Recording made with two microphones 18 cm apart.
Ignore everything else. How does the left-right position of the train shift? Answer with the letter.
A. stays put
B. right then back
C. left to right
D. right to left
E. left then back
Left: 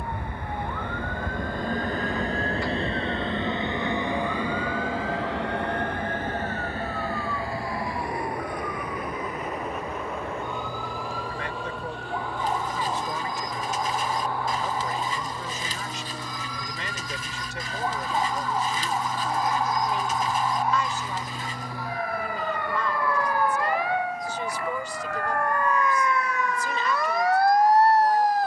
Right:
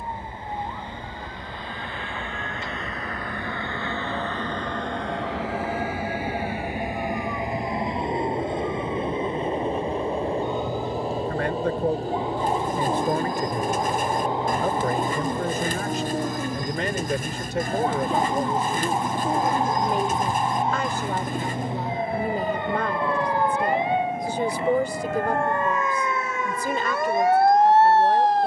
C.